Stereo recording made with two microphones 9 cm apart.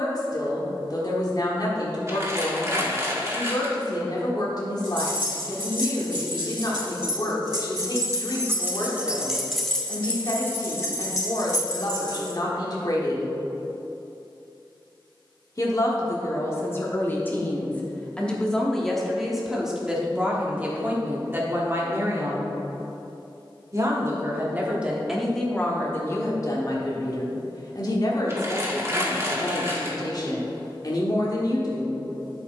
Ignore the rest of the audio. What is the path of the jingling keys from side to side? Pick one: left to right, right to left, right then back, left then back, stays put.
right to left.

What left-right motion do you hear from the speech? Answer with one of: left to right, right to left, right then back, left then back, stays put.
right then back.